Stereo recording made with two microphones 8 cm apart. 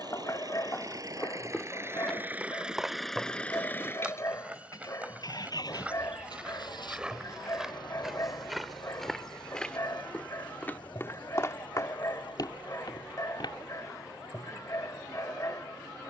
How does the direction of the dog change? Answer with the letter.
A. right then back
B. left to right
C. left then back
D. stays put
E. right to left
D.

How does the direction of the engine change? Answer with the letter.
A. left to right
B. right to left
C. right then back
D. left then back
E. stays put
B.